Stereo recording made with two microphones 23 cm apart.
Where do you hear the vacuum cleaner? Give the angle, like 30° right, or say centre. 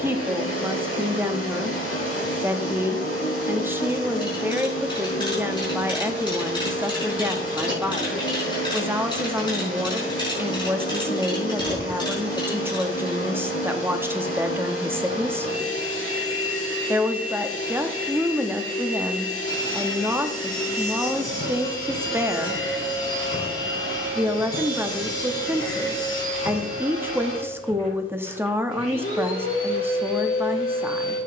70° left.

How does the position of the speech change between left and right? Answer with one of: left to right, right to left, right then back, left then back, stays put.
stays put.